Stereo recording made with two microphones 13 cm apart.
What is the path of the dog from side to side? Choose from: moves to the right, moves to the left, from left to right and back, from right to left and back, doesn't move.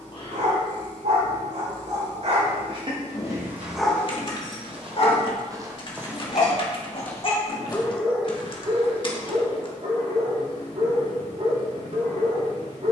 from right to left and back.